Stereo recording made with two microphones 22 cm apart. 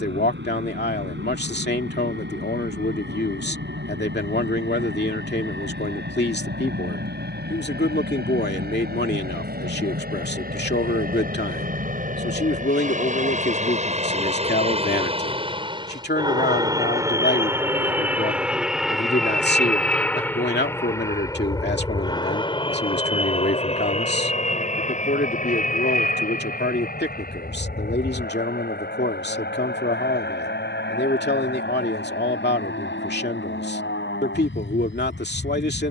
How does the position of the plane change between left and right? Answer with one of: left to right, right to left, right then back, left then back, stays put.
right to left.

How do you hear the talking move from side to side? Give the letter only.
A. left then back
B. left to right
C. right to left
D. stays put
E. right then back
D.